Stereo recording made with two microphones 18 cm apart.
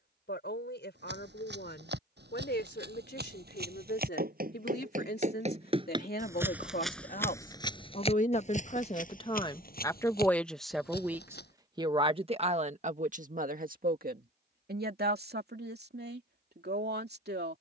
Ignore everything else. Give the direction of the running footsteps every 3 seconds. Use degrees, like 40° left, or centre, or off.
70° right, 50° right, 20° left, 60° left, off, off.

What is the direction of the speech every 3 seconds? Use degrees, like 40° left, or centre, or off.
70° left, 70° left, 50° left, 10° left, 50° right, 70° right.